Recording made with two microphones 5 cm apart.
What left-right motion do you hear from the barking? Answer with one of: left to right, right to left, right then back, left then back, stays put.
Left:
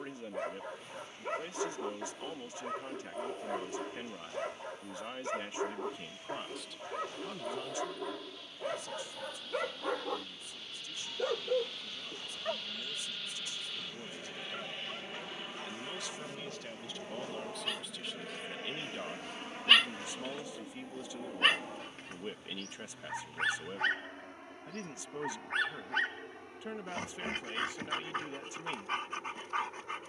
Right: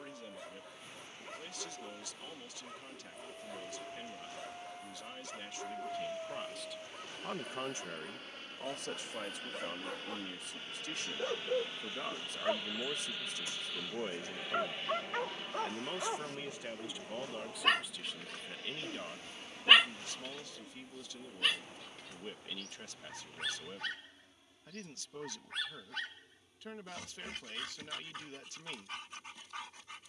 right then back.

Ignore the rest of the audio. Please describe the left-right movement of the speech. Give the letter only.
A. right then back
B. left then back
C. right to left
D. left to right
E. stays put
A.